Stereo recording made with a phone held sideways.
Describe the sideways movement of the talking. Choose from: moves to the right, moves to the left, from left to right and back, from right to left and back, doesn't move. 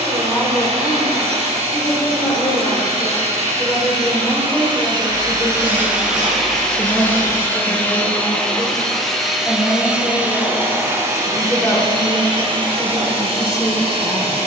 doesn't move.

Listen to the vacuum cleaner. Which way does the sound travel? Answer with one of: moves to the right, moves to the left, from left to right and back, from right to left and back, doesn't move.
from right to left and back.